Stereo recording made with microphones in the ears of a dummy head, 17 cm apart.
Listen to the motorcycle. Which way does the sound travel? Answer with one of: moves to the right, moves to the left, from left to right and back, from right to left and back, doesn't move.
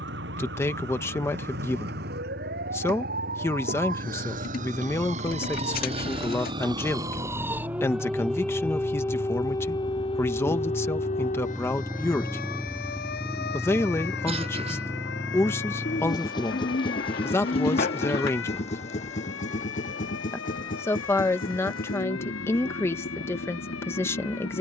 moves to the left.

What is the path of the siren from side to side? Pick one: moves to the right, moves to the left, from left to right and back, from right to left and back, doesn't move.
moves to the left.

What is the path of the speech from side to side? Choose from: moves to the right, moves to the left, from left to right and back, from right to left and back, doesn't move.
doesn't move.